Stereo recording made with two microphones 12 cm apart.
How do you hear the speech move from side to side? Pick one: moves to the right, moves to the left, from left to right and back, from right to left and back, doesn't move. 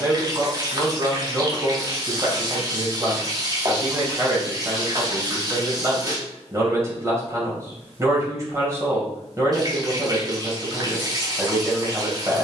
doesn't move.